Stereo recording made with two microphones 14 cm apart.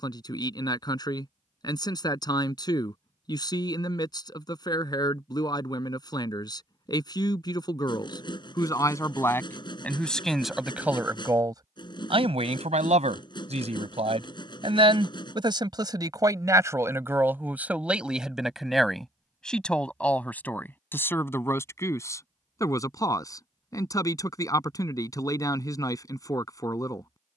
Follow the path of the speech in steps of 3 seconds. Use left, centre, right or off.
left, left, left, centre, right, right, centre, left, left.